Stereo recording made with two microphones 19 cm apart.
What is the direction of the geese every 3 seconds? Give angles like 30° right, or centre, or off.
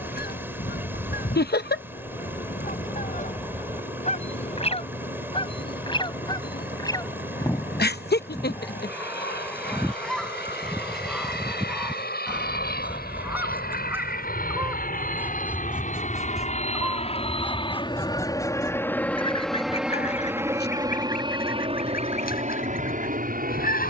50° left, 30° left, 20° left, centre, 10° right, centre, 30° left, 50° left.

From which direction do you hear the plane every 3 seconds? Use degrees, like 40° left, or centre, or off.
80° left, 70° left, 70° left, 70° left, 60° left, 40° left, centre, 40° right.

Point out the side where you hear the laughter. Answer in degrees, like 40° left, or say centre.
60° left.